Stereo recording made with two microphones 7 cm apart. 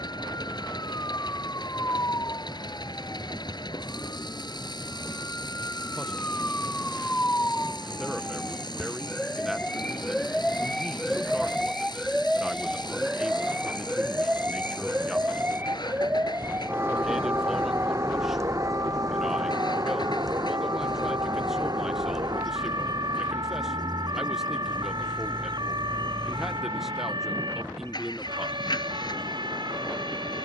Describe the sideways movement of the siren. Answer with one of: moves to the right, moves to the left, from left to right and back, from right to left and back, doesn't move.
moves to the right.